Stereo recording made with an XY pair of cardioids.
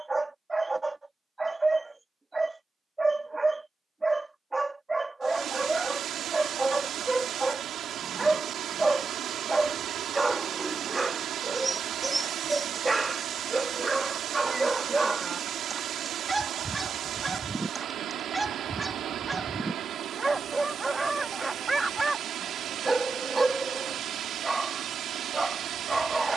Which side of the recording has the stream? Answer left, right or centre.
right.